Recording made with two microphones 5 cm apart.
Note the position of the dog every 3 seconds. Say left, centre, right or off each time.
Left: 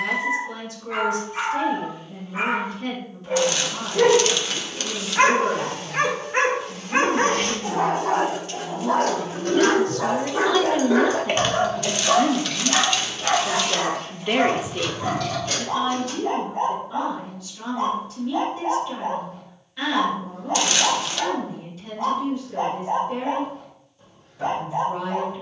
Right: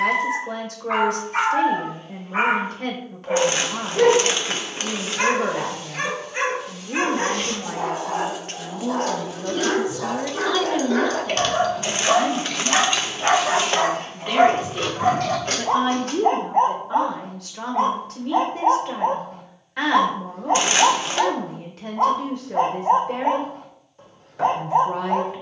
right, left, left, left, right, right, right, right, right.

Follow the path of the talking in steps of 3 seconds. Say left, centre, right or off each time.
right, right, right, centre, left, right, right, right, right.